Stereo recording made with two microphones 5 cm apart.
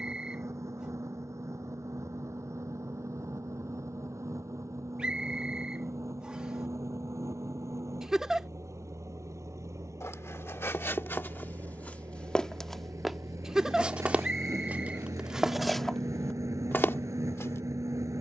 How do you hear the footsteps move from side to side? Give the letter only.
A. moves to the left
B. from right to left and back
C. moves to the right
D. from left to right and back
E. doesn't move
D.